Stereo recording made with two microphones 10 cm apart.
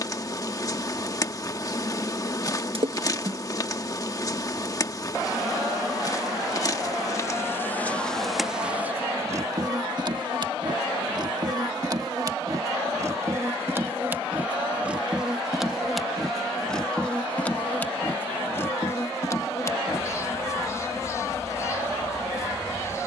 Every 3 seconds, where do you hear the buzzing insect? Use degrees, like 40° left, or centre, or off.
30° left, 30° left, 20° left, 40° right, 20° right, centre, 30° left, 30° left.